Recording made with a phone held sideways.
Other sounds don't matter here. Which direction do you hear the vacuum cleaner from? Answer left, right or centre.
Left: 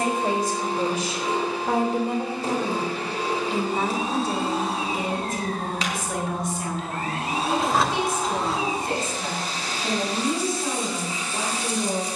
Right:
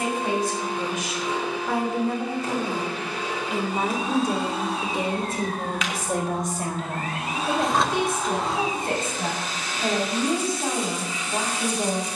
left.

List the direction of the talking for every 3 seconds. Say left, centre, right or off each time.
left, right, right, right.